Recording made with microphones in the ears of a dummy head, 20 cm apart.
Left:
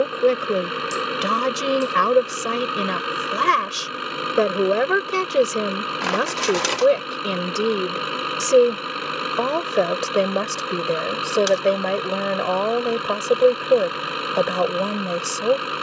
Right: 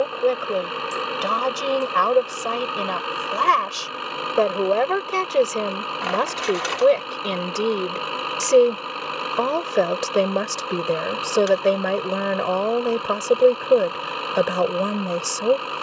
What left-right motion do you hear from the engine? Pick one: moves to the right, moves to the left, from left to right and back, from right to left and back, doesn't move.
doesn't move.